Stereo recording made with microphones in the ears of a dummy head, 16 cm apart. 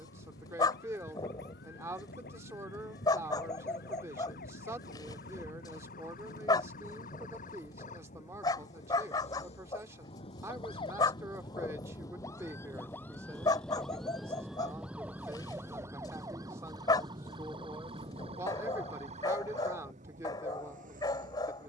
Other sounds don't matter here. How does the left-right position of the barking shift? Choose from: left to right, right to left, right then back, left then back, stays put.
stays put.